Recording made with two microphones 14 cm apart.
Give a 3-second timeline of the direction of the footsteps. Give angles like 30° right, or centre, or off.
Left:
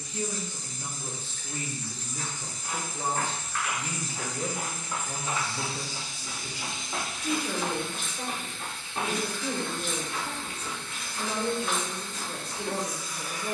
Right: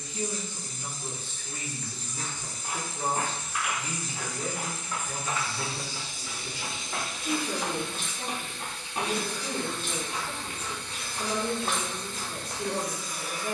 40° right, 10° left, 10° left, 30° right, 50° right.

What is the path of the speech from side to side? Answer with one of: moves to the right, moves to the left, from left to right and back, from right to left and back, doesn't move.
doesn't move.